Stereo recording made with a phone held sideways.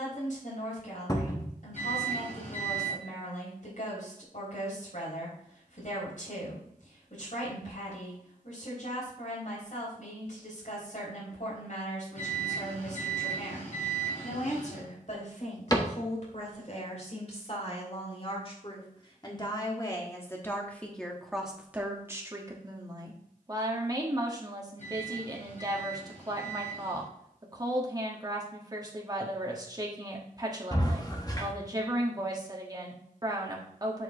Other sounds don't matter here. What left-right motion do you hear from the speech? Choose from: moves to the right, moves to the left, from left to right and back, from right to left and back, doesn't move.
moves to the right.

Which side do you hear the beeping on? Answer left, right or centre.
left.